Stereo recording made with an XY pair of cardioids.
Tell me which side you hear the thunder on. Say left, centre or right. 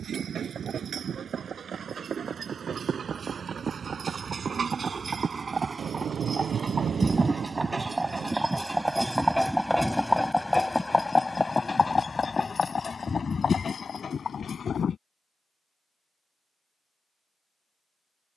right.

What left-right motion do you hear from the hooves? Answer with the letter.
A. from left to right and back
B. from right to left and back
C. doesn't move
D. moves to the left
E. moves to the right
D.